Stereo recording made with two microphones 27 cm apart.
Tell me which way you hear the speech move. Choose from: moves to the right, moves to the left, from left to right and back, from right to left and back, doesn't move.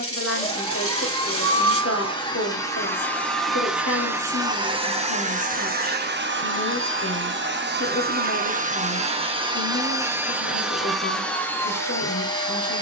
doesn't move.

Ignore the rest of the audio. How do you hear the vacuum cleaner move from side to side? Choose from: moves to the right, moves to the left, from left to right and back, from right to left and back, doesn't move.
from left to right and back.